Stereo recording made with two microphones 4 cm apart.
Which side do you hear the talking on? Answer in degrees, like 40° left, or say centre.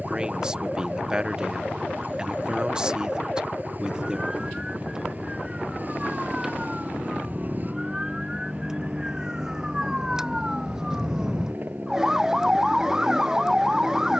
20° right.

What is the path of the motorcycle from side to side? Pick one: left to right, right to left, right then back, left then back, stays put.
stays put.